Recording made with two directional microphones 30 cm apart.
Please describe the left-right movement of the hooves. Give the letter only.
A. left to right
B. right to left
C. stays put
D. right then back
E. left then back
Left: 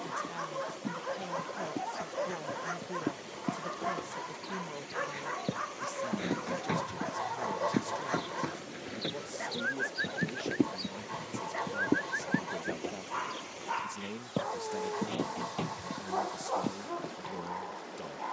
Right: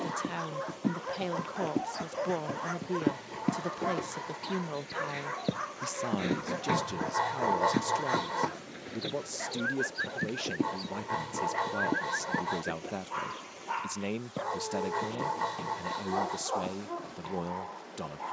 B.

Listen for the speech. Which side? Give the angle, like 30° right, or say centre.
40° right.